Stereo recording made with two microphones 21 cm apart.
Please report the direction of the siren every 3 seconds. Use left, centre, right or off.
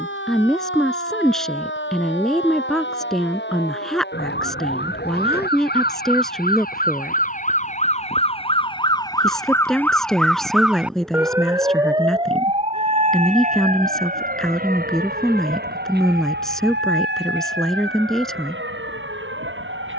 left, left, left, centre, right, right, right.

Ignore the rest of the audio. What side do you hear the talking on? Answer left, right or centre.
centre.